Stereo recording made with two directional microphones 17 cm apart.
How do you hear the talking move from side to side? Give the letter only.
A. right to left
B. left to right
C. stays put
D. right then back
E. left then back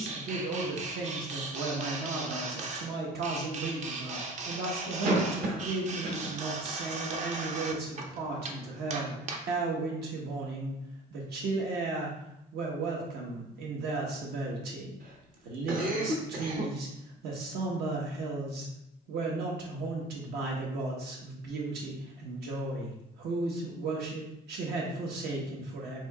C.